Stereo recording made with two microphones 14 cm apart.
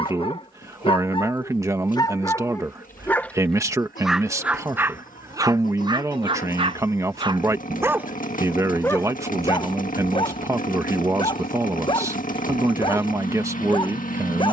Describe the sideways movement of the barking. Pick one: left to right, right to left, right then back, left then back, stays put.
right then back.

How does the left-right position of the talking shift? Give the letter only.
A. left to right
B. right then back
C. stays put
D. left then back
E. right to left
C.